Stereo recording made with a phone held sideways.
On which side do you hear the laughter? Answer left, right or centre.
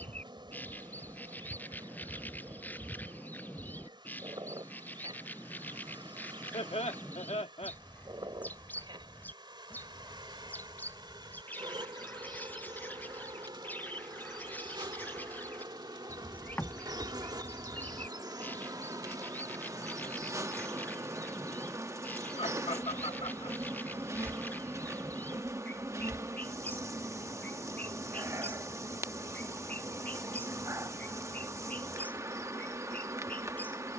left.